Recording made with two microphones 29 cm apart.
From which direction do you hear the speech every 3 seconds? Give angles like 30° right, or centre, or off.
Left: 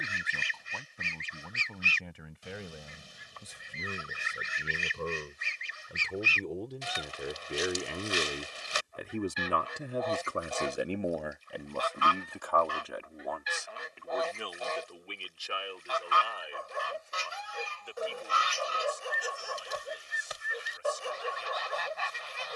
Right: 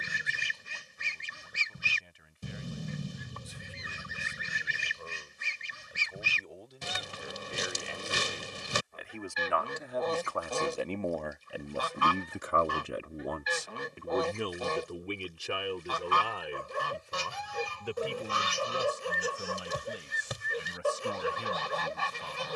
80° left, 70° left, 60° left, 20° left, 40° right, 60° right, 70° right, 70° right.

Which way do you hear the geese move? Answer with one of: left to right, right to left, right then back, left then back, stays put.
stays put.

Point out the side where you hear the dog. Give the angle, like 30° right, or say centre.
40° right.